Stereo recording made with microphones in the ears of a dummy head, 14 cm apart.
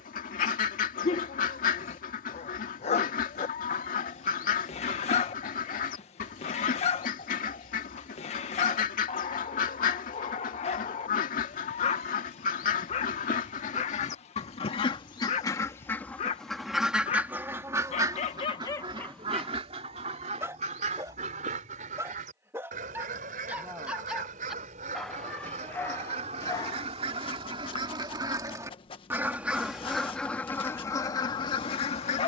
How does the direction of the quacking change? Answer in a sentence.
In this clip you hear the quacking go right and come back.